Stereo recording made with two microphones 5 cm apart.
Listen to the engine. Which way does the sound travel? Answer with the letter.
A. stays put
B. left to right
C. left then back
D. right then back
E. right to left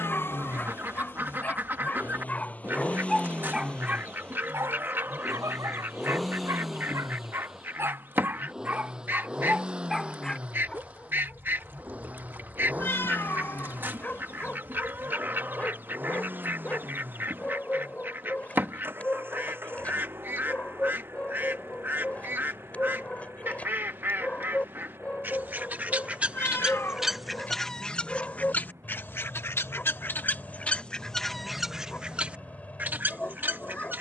B.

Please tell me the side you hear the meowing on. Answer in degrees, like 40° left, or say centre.
50° left.